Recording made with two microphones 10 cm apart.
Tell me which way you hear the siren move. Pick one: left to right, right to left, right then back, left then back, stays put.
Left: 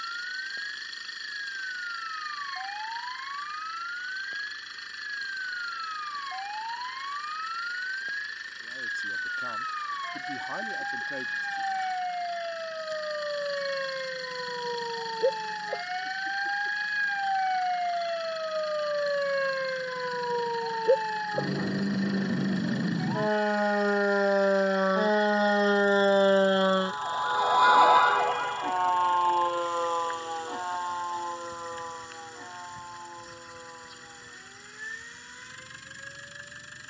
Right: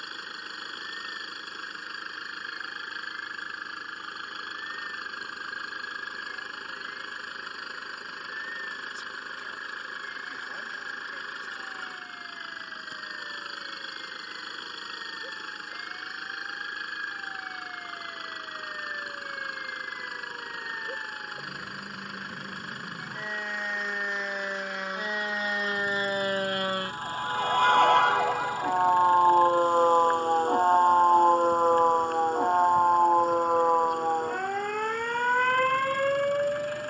left to right.